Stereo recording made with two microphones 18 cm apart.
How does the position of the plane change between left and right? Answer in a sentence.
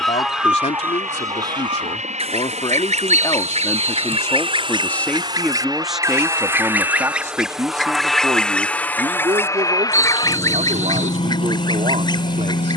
In this clip you hear the plane move from right to left.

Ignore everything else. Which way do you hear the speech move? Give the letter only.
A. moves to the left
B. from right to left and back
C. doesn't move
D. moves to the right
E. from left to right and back
D.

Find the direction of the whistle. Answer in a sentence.
You can hear the whistle on the right.